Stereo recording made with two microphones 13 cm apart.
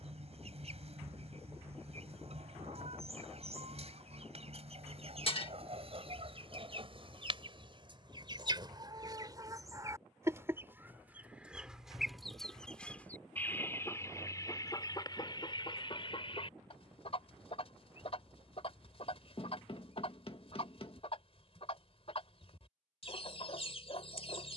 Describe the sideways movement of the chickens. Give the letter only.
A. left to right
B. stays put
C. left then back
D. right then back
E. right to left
E.